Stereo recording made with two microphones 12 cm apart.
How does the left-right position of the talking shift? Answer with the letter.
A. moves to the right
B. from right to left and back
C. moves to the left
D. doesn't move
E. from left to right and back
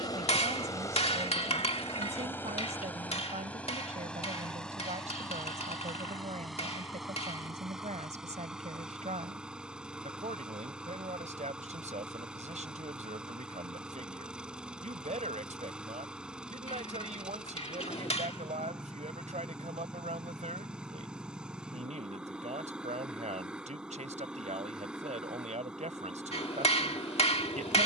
D.